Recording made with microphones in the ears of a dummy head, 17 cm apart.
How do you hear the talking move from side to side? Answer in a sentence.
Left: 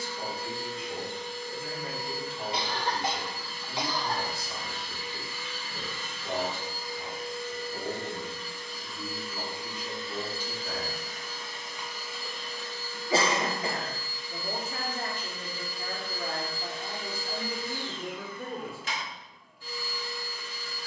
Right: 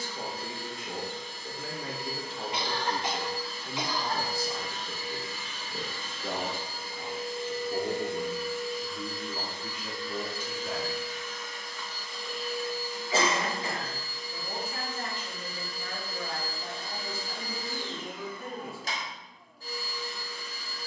You can hear the talking travel towards the left.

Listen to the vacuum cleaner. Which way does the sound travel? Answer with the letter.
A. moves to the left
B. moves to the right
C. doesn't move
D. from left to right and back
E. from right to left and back
E.